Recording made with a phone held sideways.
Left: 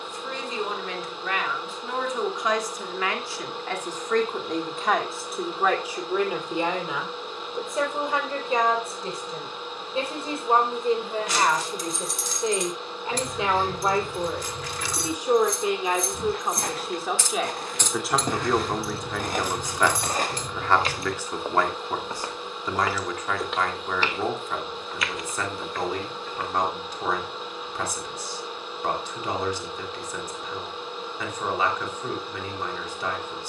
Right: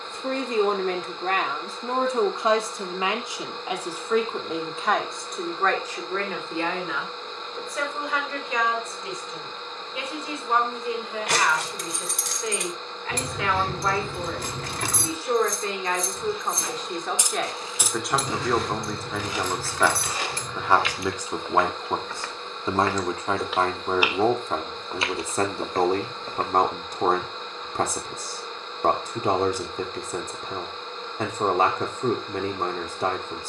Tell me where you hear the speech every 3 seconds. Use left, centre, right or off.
right, centre, left, left, left, centre, centre, right, right, right, right.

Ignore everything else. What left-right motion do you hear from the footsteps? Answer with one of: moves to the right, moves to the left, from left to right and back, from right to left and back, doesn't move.
moves to the right.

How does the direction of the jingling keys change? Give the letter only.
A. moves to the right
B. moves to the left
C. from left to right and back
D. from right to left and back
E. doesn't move
B.